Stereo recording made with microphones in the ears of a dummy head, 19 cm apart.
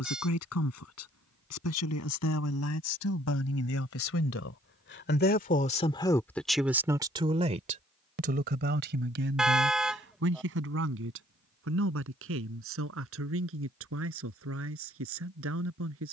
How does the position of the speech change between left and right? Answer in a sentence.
You can hear the speech go from the left side to the right.